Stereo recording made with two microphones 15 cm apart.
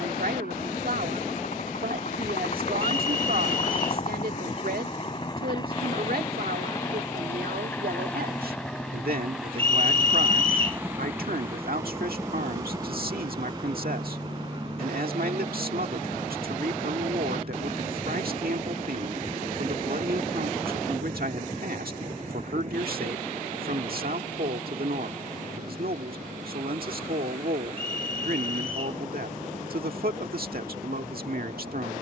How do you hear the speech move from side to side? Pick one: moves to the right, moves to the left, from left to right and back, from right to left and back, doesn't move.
doesn't move.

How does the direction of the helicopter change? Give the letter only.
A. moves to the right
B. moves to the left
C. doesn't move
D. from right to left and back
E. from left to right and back
A.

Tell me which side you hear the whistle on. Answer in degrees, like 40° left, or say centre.
40° right.